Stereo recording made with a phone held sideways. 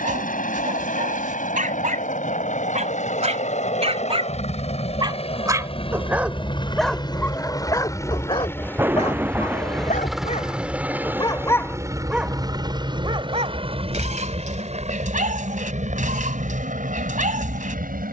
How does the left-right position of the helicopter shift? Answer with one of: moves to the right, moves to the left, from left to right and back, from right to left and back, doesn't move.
moves to the right.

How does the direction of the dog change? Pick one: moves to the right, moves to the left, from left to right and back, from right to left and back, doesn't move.
from right to left and back.